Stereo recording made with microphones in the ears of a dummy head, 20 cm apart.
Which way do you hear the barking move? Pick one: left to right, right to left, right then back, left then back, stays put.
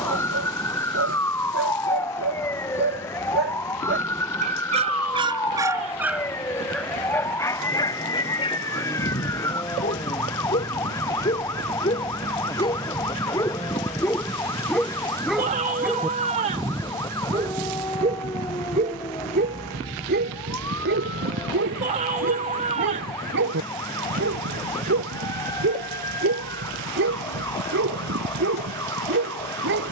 left then back.